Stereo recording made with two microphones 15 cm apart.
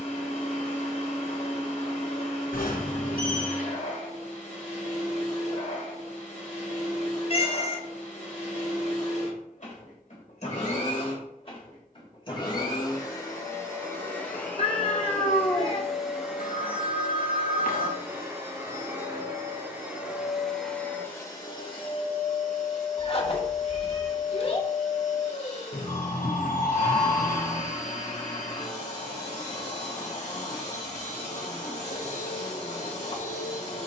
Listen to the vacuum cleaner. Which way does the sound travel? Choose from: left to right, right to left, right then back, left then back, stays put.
right then back.